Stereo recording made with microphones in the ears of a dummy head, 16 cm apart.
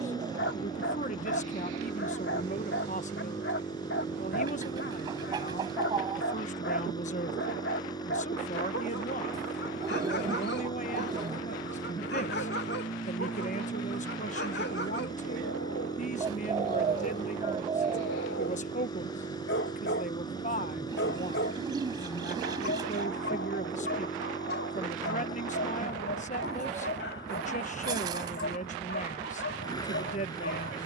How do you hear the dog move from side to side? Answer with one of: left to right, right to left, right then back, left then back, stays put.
stays put.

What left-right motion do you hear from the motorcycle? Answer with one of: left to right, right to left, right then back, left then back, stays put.
stays put.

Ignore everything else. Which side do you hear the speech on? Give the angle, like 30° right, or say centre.
40° left.